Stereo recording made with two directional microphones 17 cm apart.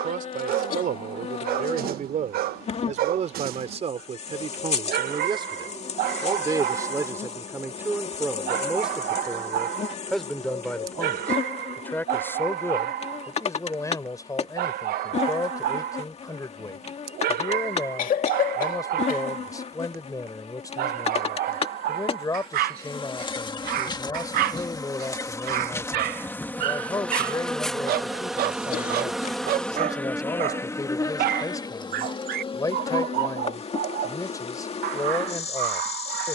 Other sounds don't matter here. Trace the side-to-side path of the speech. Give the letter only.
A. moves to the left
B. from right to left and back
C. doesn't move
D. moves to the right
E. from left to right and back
A.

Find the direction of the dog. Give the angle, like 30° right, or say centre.
60° right.